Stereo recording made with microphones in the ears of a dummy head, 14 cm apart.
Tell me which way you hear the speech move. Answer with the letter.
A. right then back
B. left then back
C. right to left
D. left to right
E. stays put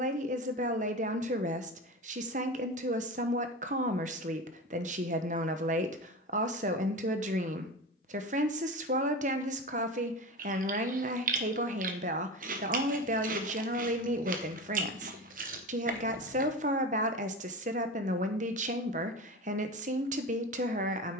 E.